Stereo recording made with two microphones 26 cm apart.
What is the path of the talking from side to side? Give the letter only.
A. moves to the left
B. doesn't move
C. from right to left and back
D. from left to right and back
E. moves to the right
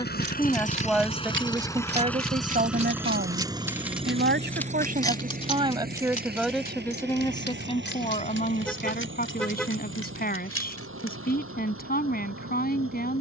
D.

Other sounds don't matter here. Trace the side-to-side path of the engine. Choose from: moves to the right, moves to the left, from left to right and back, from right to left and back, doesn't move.
moves to the right.